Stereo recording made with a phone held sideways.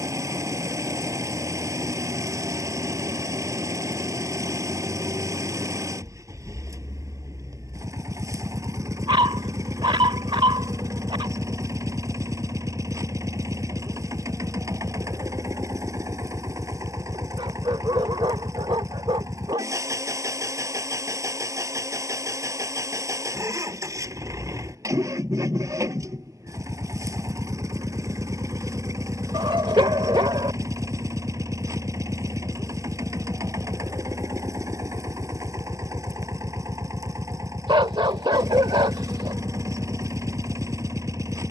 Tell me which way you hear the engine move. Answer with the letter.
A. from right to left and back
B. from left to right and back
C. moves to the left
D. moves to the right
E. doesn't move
E.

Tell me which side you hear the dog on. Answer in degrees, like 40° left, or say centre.
30° right.